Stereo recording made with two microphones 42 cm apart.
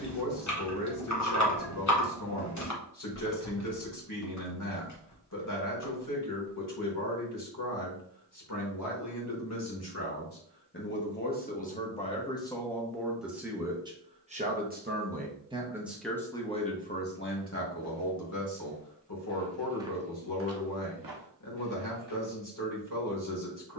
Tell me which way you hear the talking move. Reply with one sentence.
You can hear the talking move from left to right and back again.